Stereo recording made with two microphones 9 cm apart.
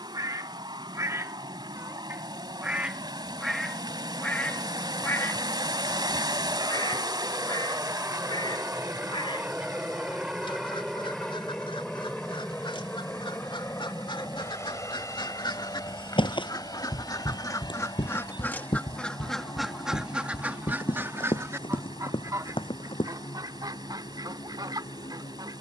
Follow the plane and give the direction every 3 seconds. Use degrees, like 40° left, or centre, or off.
70° right, 60° right, 30° right, centre, 20° left, 40° left, 50° left, 60° left, 60° left.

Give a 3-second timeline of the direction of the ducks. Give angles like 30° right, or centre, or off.
30° right, 20° left, 60° left, 70° left, 70° left, 50° left, centre, 40° right, 50° right.